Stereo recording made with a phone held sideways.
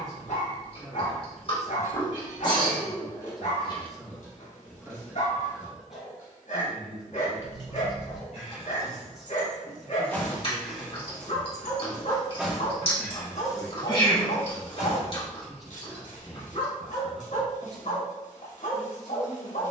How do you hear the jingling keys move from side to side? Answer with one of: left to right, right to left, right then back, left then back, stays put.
right then back.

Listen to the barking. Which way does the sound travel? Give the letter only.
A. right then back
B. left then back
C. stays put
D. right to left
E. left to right
C.